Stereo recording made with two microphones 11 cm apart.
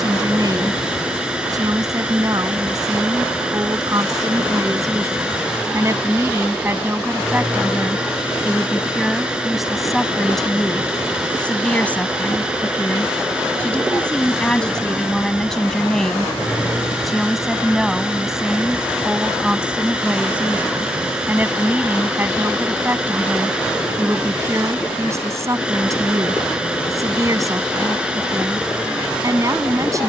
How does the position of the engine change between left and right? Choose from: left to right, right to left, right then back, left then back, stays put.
stays put.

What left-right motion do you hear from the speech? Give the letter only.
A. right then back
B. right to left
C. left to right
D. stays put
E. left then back
E.